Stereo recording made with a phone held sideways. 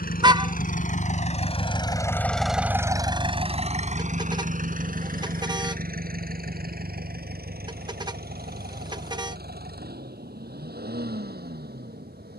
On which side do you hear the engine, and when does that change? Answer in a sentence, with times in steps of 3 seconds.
You can hear the engine on the left from 0 s and on the right from 3 s.